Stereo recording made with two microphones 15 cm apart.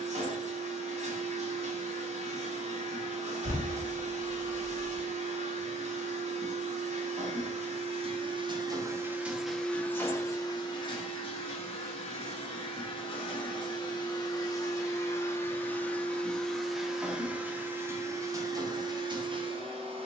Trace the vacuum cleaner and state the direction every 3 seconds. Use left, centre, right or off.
right, right, right, left, left, centre, right.